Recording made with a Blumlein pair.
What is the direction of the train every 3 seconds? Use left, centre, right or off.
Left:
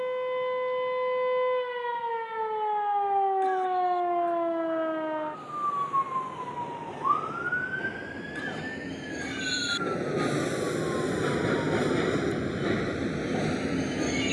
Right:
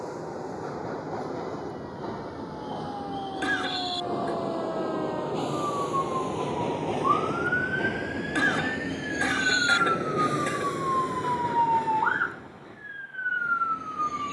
right, right, right, centre, left.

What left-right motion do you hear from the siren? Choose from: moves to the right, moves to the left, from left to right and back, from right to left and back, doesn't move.
moves to the right.